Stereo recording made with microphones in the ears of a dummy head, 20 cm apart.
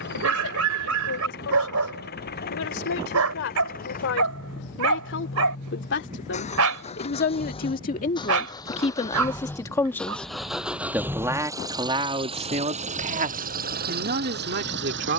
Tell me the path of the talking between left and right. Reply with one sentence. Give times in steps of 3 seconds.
In this clip you hear the talking on the left from 0 s, in the centre from 9 s and on the right from 12 s.